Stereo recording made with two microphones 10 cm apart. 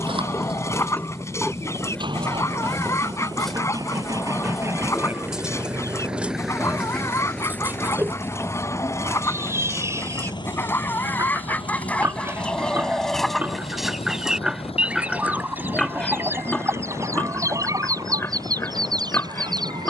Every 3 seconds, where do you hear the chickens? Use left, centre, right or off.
left, left, left, left, centre, right, right.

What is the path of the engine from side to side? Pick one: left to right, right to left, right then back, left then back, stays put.
right to left.